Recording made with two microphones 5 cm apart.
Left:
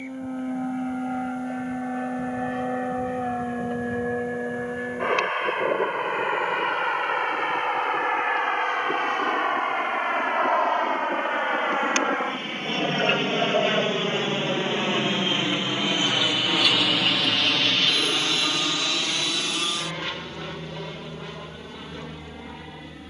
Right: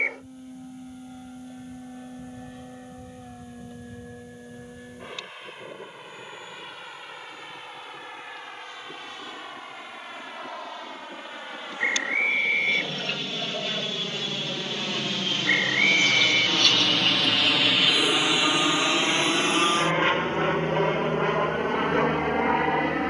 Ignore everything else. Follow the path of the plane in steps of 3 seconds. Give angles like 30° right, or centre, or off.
70° left, 70° left, 70° left, 60° left, 40° left, 10° left, 30° right, 50° right.